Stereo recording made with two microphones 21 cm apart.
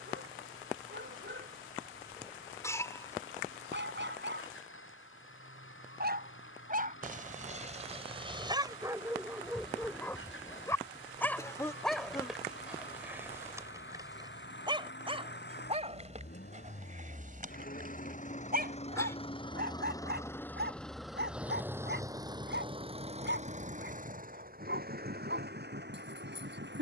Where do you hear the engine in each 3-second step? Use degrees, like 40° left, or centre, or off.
80° left, 80° left, 70° left, 70° left, 60° left, 50° left, 20° left, 20° right, 50° right.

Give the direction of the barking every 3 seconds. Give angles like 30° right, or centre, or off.
60° right, 60° right, 30° right, centre, 10° right, 40° right, 50° right, 60° right, 60° right.